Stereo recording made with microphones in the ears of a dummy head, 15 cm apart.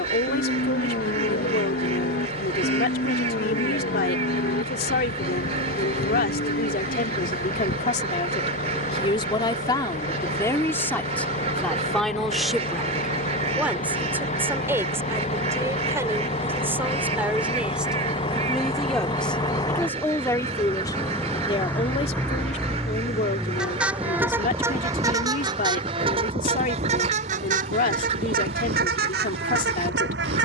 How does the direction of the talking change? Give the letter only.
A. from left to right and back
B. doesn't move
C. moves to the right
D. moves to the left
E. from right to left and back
A.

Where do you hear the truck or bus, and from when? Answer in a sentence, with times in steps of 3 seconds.
You can hear the truck or bus on the left from 0 s, in the centre from 21 s and on the right from 24 s.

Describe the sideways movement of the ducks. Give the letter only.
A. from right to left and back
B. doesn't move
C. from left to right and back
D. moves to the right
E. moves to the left
B.